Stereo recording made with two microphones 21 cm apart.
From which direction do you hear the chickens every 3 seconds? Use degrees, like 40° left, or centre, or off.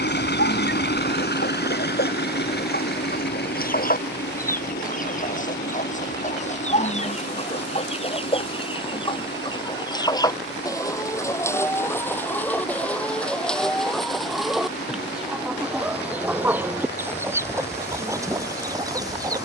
60° left, 40° left, 30° left, 20° left, centre, 10° right, 20° right.